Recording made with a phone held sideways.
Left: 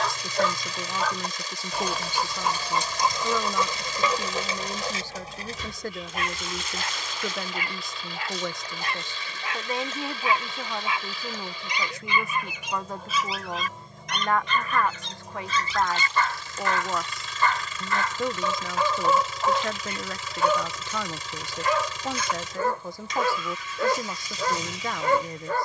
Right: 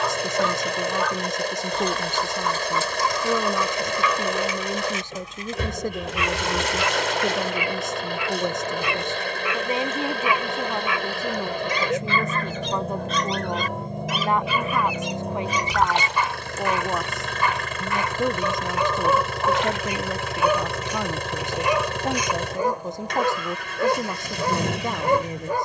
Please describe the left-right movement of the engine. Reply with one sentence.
You can hear the engine stay put.